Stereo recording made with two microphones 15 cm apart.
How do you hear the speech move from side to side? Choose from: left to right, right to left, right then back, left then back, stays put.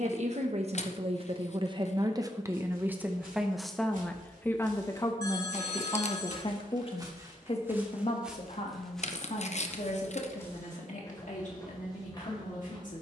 right to left.